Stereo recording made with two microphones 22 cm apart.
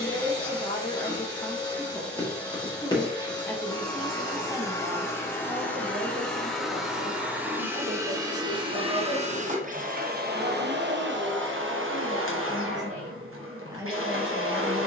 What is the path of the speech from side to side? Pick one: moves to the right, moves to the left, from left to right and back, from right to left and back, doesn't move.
from left to right and back.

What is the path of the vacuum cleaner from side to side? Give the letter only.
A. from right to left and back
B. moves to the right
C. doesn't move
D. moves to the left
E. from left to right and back
B.